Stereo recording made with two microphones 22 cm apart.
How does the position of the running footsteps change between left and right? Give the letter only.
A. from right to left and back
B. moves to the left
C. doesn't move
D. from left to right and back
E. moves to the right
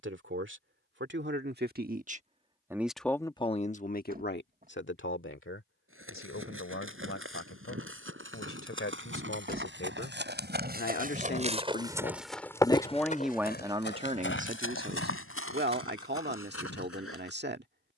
B.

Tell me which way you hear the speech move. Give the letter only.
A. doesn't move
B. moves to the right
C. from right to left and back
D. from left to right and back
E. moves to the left
C.